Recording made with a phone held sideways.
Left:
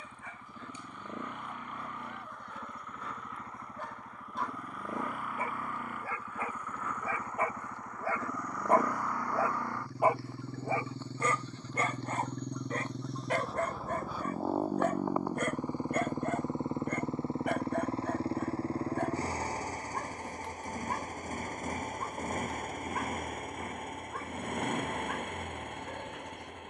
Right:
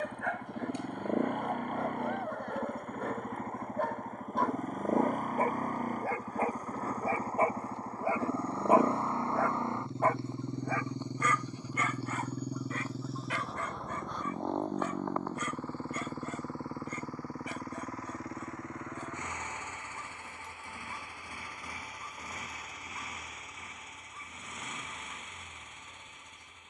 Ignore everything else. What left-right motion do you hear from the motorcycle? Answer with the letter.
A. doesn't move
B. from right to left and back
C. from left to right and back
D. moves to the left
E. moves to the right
D.